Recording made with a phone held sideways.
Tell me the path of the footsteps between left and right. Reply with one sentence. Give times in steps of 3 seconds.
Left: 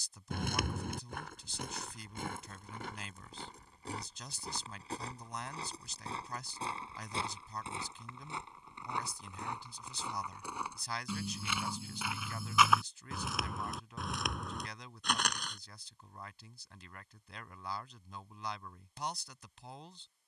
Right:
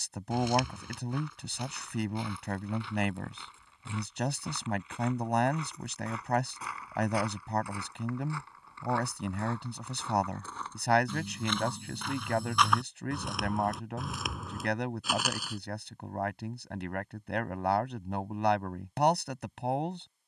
In this clip you hear the footsteps on the left from 0 s, in the centre from 9 s and not at all from 18 s.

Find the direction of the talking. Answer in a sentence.
You can hear the talking on the right.